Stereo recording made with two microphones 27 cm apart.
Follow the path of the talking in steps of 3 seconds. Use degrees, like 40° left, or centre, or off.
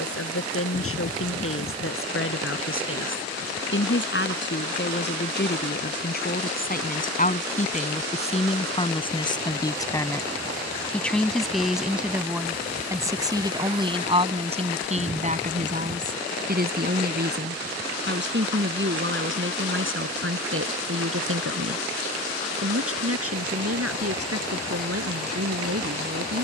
50° left, 40° left, 30° left, 10° left, 20° right, 30° right, 50° right, 60° right, 60° right.